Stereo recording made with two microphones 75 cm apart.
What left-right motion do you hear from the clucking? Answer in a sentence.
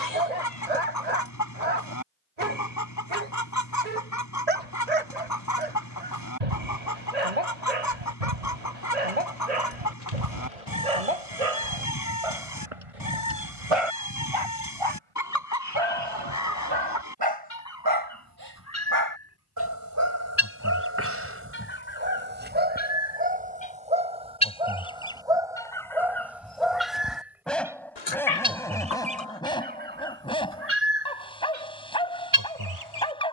You can hear the clucking move from left to right.